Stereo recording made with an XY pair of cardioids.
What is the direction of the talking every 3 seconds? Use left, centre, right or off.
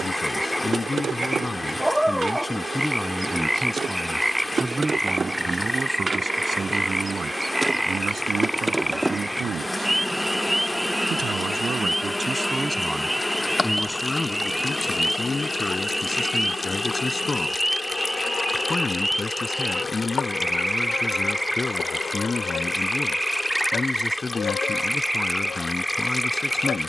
left, centre, right, right, centre, left, left, left, left.